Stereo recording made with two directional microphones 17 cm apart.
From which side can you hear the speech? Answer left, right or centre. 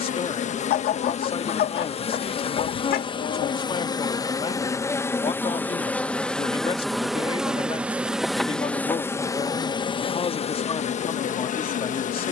left.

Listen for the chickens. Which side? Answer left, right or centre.
left.